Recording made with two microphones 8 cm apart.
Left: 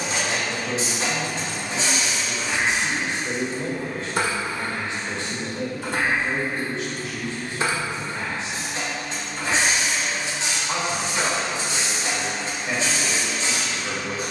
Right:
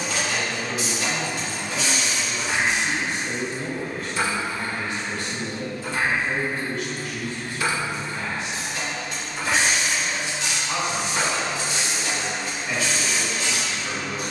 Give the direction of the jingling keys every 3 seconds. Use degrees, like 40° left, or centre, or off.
centre, 60° left, 30° left, 20° right, off.